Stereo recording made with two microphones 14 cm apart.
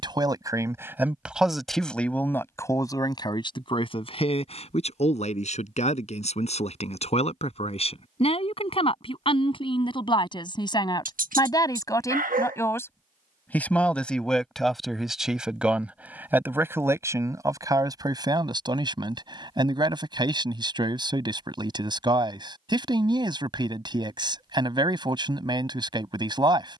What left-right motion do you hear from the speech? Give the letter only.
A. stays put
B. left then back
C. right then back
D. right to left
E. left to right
B.